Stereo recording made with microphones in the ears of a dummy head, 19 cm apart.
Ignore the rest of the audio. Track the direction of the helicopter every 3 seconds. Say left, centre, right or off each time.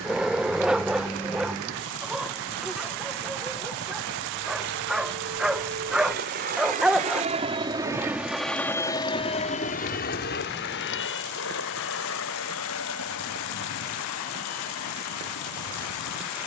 right, right, right, left, left, left.